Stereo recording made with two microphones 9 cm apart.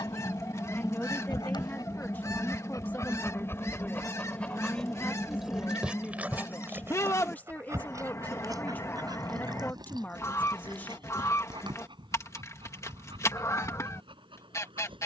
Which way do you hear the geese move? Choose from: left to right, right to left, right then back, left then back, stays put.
stays put.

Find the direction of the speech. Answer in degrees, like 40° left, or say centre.
20° left.